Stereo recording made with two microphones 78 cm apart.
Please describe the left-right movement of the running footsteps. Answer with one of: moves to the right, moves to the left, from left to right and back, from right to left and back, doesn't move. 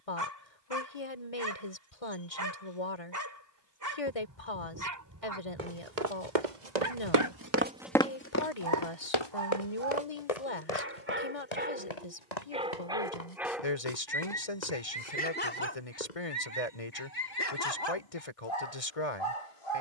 moves to the left.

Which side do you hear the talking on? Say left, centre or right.
left.